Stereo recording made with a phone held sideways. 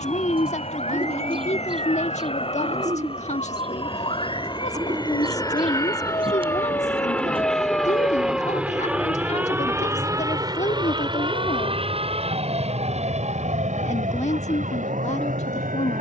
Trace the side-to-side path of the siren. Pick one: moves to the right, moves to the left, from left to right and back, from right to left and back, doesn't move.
moves to the right.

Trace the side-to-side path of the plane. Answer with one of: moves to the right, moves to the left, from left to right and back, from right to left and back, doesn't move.
moves to the right.